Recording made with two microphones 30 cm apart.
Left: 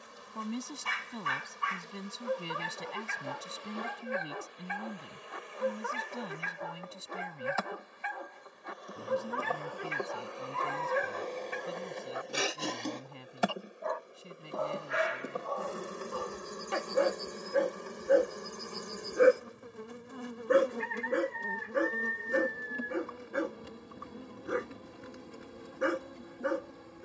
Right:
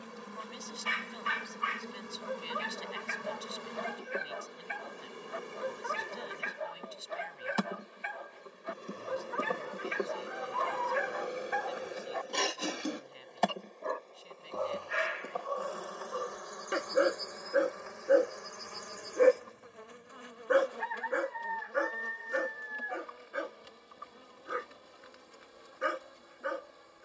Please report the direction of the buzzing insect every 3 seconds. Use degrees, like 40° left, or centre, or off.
60° right, 50° right, 40° right, 20° right, 10° left, 30° left, 50° left, 60° left, 60° left.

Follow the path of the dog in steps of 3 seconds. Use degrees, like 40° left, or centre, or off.
50° left, 50° left, 50° left, 50° left, 20° right, 20° right, 20° left, 50° left, 50° left.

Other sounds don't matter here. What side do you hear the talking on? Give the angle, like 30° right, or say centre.
60° left.